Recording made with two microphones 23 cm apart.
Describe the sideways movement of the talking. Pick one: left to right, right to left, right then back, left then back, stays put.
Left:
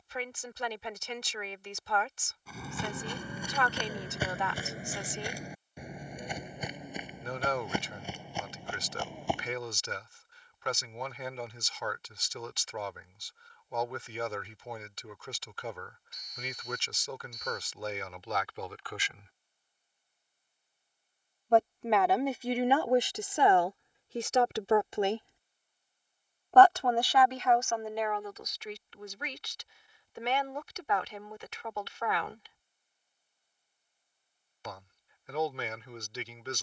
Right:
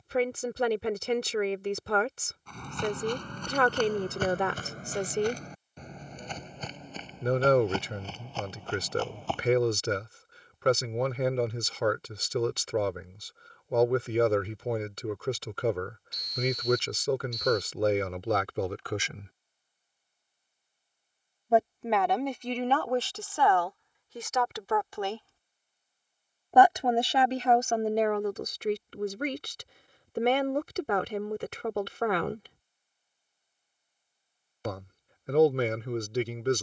left then back.